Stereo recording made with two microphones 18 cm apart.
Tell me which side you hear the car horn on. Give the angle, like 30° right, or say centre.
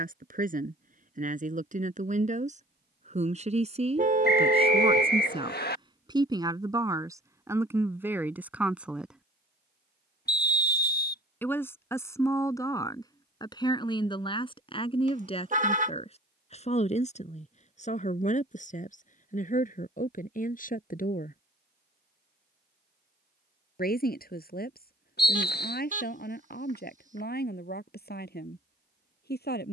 50° right.